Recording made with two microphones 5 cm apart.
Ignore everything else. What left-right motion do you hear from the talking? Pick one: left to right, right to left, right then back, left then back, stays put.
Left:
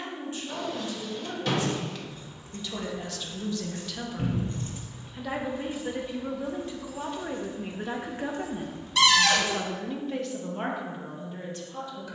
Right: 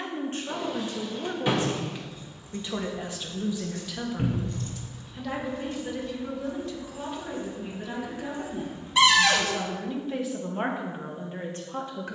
left then back.